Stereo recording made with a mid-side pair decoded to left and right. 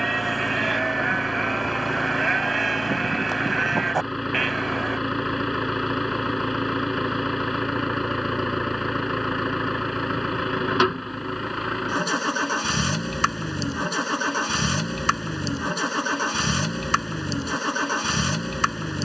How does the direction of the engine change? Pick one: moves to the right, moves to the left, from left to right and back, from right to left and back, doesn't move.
doesn't move.